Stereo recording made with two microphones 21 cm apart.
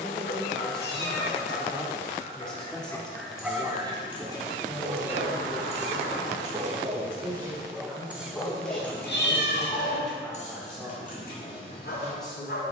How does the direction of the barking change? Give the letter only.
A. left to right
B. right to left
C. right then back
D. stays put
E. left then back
C.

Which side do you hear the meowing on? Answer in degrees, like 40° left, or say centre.
60° left.